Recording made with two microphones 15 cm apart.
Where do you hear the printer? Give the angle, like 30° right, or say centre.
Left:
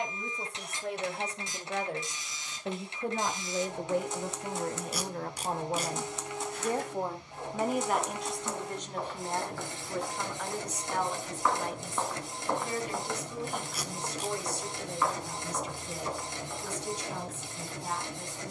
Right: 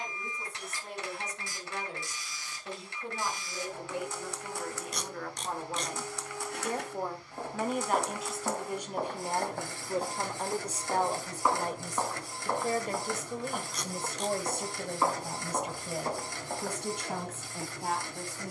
20° left.